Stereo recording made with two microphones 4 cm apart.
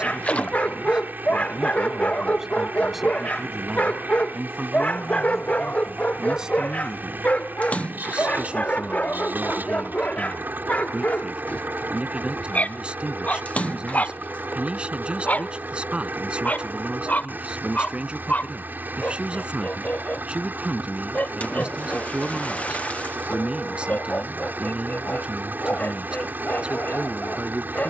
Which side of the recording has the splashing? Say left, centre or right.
left.